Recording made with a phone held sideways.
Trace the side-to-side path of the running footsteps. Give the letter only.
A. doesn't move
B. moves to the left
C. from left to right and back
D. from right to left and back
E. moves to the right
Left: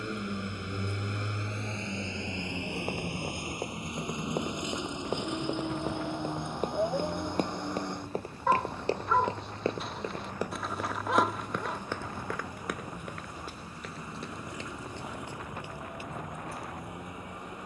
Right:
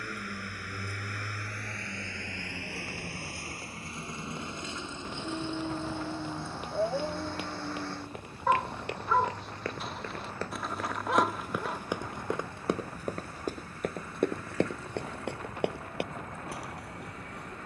E.